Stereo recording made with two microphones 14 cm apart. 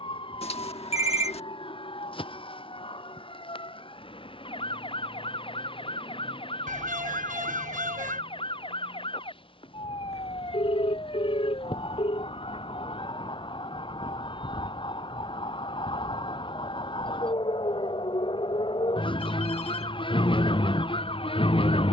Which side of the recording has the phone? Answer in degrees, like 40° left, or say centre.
50° left.